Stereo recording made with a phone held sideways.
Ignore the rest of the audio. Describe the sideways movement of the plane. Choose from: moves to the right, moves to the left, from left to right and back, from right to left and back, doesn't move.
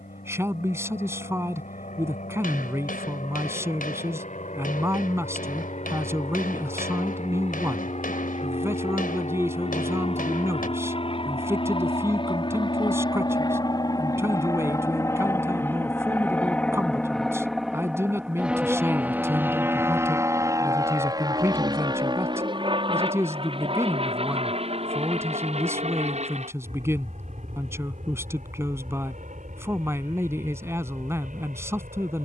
moves to the right.